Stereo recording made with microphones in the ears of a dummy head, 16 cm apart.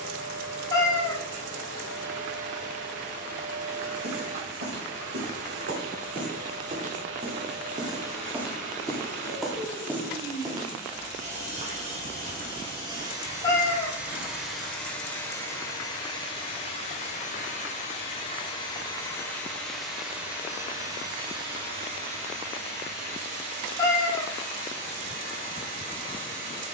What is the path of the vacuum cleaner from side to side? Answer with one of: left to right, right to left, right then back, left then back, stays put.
left then back.